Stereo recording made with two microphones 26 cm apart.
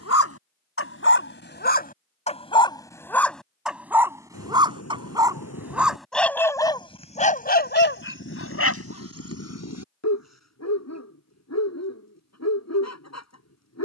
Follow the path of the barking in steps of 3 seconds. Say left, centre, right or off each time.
left, centre, left, left, left.